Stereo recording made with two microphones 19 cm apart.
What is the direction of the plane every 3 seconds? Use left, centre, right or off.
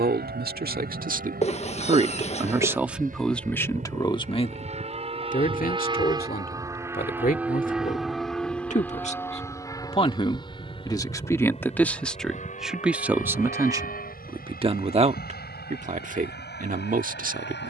right, right, centre, left, left, left.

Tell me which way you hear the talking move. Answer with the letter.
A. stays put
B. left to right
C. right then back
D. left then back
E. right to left
D.